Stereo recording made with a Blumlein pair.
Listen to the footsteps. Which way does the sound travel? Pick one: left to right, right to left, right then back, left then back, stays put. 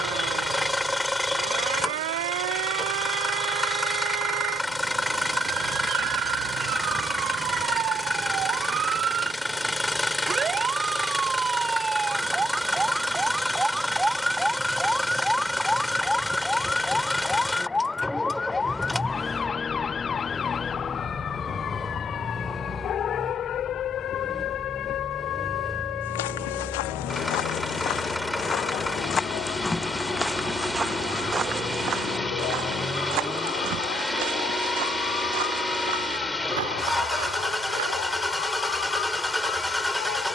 left to right.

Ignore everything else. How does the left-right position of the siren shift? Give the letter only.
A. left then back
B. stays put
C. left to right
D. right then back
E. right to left
E.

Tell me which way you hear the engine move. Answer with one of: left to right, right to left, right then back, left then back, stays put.
stays put.